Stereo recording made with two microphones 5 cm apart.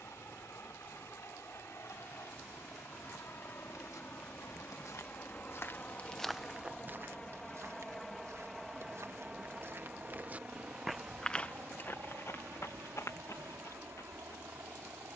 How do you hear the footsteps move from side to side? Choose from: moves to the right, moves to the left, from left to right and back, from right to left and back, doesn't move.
from left to right and back.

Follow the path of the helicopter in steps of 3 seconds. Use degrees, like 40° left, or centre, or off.
60° left, 40° left, 10° left, 20° right, 40° right.